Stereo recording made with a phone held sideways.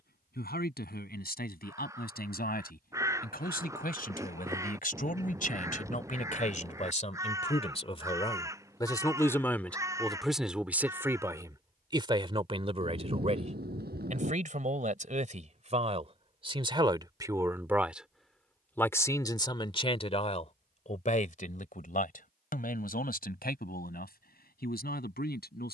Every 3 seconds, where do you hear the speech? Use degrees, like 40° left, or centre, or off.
70° left, 60° left, 40° left, centre, 40° right, 30° right, 30° left, 60° left, 70° left.